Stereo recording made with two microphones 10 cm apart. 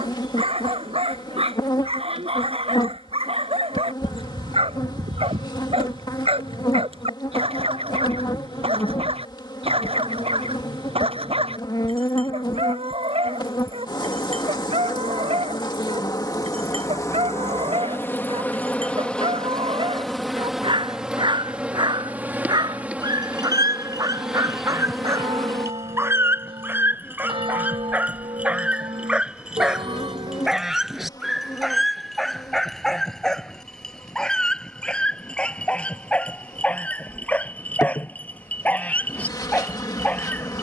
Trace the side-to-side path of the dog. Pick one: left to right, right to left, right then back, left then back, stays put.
right to left.